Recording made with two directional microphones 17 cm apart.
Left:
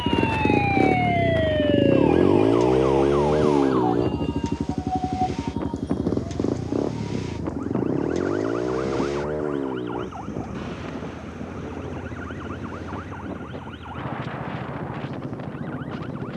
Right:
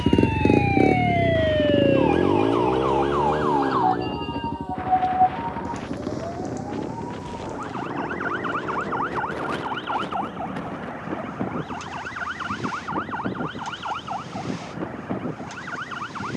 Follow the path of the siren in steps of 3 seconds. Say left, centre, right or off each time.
centre, right, right, right, right, right.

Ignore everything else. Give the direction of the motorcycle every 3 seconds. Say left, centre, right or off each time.
centre, left, left, left, left, left.